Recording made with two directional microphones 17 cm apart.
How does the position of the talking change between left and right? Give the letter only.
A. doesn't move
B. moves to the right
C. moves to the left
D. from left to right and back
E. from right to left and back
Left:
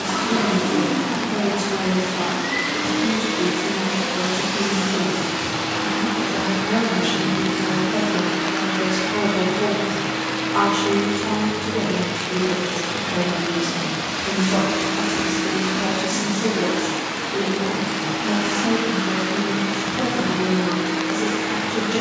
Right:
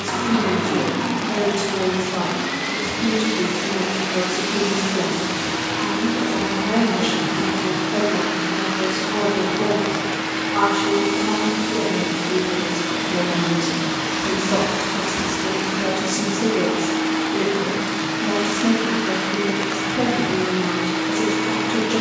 E.